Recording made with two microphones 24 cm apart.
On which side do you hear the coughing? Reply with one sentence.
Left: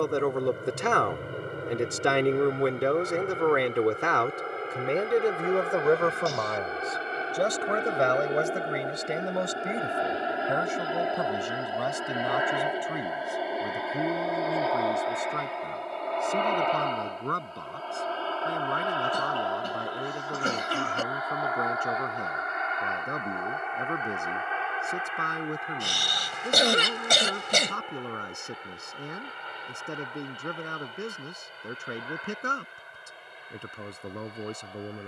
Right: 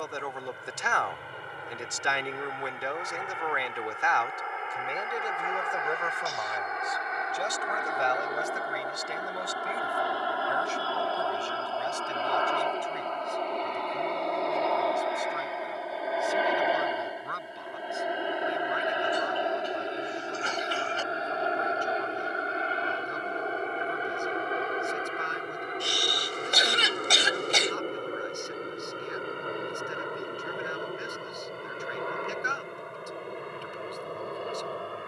You can hear the coughing on the left.